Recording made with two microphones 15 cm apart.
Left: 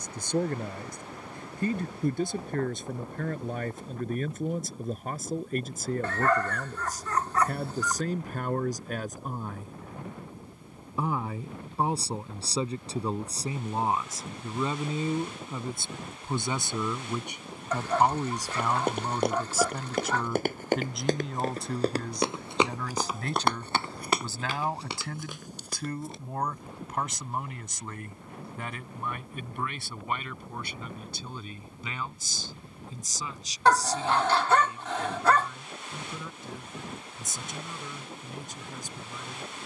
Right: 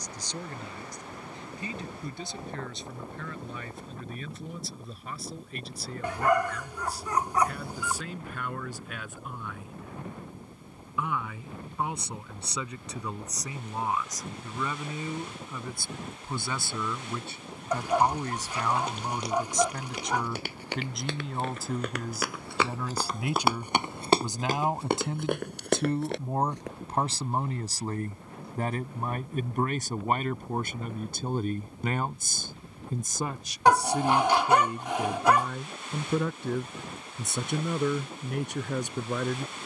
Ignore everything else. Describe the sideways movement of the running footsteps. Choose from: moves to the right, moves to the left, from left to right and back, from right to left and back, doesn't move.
moves to the right.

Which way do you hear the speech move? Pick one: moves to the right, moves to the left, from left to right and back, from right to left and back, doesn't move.
moves to the right.